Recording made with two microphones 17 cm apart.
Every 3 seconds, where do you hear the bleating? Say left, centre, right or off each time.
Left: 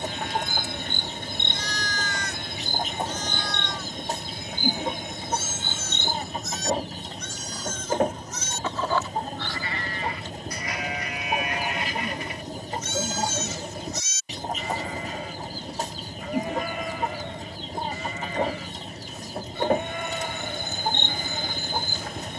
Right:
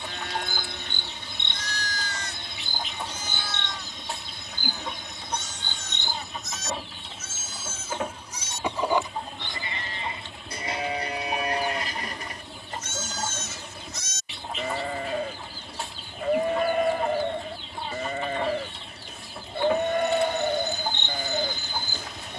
right, centre, centre, right, right, right, right, right.